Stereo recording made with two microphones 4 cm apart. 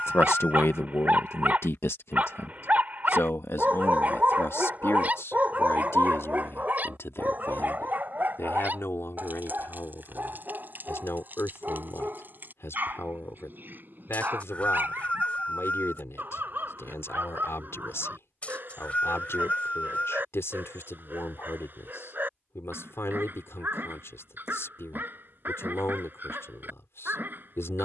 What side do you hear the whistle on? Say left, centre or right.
left.